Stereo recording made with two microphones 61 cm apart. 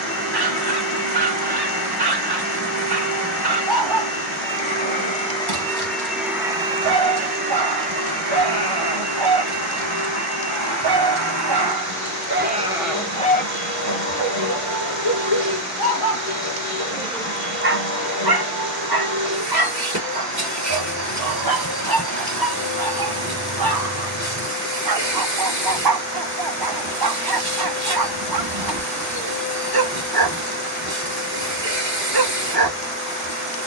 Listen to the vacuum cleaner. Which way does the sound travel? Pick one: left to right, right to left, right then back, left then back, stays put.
left to right.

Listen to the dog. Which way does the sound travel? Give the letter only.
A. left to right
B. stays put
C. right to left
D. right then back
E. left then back
E.